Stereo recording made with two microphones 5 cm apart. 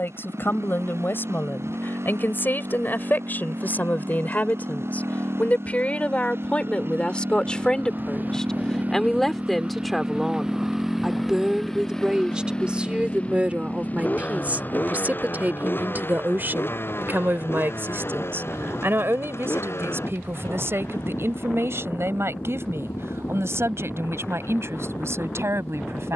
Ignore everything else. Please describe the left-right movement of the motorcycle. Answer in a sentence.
You can hear the motorcycle move from right to left.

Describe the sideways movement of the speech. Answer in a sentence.
You can hear the speech move from left to right.